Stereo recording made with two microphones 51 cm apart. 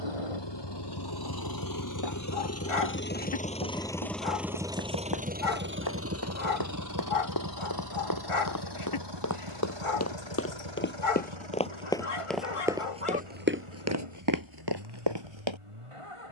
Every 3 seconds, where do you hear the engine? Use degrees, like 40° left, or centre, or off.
40° left, centre, 40° right, 50° right, 60° right, 70° right.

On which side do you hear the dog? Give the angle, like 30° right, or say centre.
70° left.